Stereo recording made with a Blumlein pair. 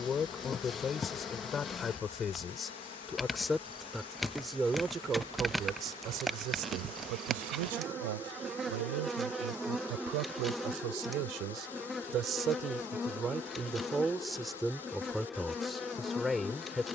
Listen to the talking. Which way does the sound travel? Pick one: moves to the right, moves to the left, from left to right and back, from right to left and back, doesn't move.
from left to right and back.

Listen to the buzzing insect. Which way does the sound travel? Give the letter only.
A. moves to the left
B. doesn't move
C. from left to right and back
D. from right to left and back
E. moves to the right
C.